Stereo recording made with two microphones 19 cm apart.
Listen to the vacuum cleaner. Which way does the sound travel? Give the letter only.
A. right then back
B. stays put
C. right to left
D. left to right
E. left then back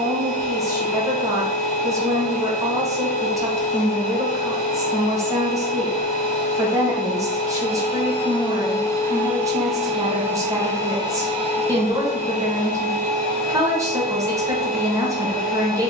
D.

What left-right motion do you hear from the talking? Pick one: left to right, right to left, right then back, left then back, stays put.
stays put.